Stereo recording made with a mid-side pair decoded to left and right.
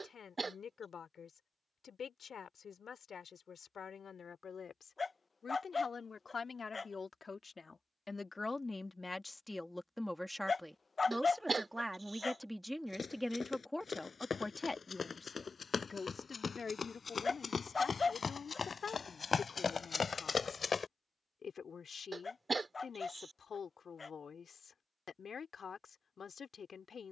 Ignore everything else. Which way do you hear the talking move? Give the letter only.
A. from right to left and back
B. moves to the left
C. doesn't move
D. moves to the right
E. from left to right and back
E.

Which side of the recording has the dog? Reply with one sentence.
You can hear the dog on the left.